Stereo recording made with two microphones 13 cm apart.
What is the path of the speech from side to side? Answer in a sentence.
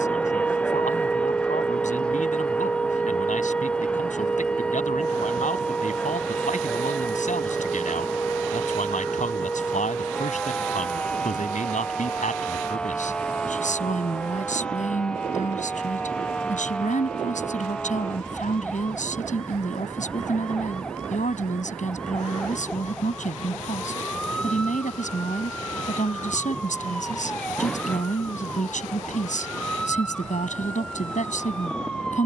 In this clip you hear the speech stay in one place.